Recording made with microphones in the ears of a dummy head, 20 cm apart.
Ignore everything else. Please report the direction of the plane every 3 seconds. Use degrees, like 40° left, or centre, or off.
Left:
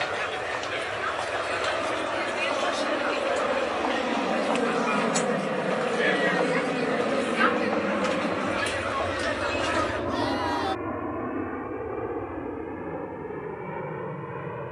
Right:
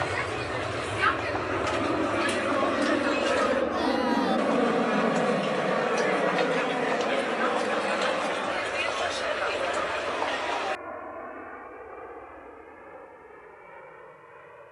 40° right, 10° right, 20° left, 40° left, 60° left.